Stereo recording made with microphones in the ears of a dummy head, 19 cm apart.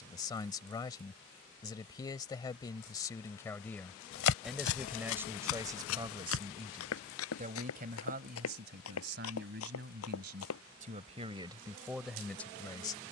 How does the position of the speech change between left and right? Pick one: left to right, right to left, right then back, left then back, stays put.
right then back.